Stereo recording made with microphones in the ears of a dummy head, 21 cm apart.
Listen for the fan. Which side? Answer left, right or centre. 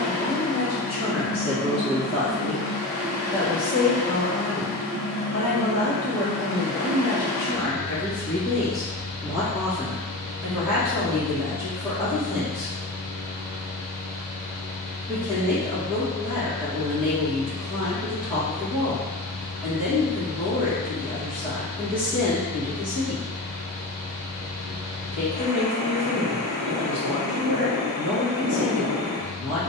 right.